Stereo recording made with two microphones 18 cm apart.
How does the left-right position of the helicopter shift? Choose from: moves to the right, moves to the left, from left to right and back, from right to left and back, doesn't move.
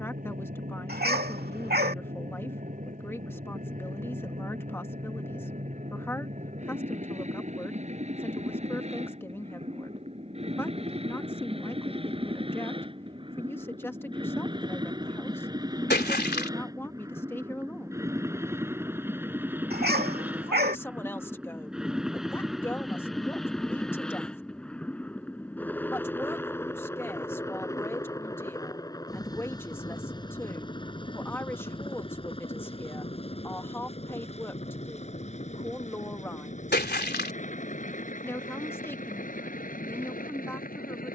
moves to the left.